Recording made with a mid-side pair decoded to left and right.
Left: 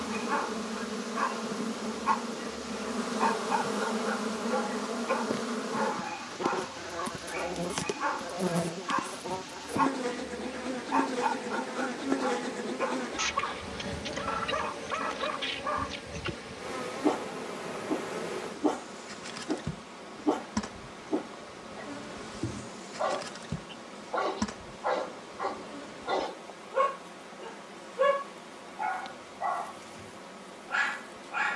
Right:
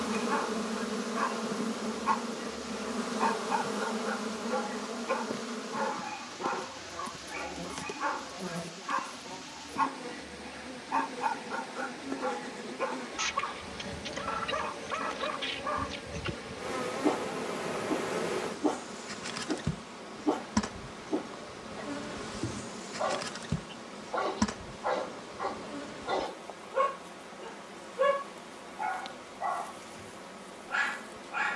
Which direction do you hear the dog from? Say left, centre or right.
centre.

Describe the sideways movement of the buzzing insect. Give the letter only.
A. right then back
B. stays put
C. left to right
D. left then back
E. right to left
D.